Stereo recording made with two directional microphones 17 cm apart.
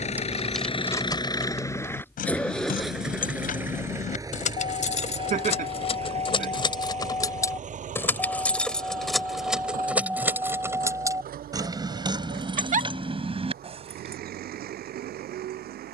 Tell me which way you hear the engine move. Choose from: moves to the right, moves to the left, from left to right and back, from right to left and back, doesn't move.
moves to the right.